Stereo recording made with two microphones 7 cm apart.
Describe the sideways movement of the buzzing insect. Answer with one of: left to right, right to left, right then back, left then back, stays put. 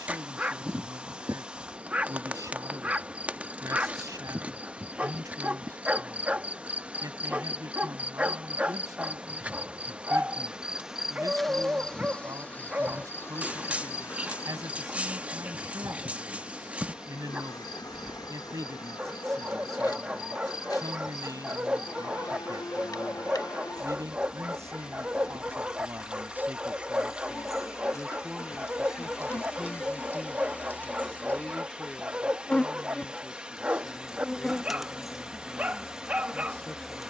left then back.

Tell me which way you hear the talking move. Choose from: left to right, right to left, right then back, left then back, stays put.
right to left.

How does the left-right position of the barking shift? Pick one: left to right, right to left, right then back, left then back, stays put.
stays put.